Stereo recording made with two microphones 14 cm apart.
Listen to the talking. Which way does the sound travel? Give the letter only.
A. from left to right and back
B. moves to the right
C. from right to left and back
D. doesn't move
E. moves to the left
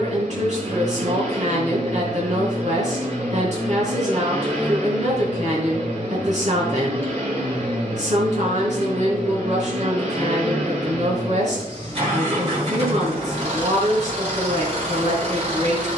D.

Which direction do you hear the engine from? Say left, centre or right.
right.